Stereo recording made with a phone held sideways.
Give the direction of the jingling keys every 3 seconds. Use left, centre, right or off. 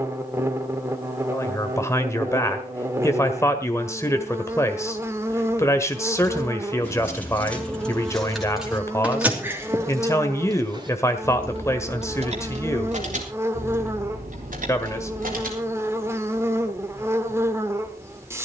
off, off, centre, right, right, right.